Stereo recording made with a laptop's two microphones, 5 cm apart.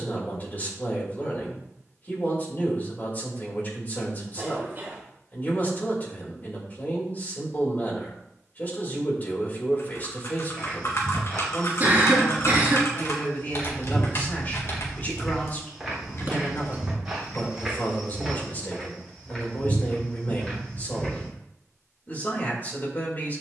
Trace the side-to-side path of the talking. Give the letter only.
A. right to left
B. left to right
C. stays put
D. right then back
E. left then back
C.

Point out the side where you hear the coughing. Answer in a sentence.
You can hear the coughing on the right.